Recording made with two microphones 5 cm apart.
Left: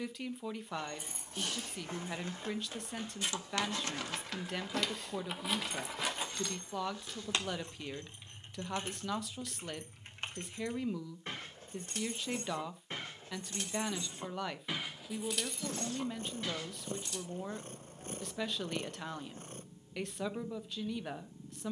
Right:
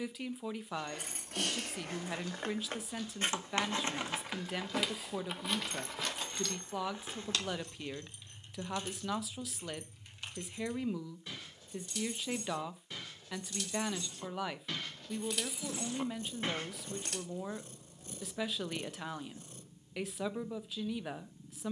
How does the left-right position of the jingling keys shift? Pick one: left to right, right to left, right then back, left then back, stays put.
left then back.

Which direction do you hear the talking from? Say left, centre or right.
centre.